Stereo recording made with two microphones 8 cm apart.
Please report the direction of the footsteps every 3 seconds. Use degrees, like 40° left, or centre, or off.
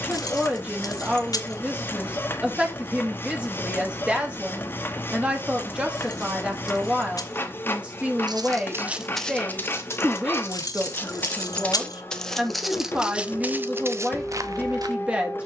off, off, 40° right, 20° left, 20° right.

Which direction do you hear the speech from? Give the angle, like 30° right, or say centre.
10° right.